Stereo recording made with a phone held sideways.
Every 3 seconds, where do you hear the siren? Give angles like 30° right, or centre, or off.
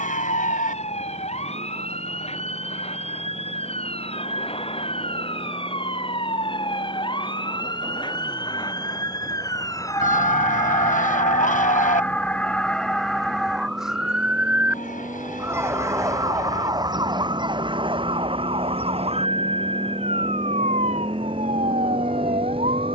50° left, 40° left, 30° left, 20° left, centre, 30° right, 50° right, 60° right.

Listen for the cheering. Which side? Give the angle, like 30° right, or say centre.
70° left.